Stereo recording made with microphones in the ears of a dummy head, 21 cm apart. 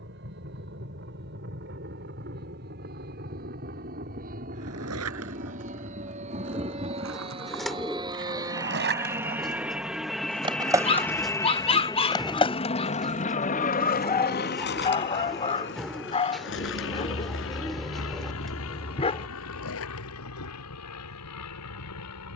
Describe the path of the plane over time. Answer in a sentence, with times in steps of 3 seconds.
You can hear the plane on the right from 0 s, in the centre from 9 s and on the left from 12 s.